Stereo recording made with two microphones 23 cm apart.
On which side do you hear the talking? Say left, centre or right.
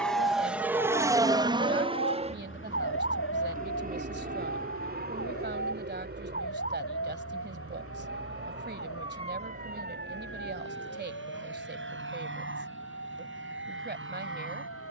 right.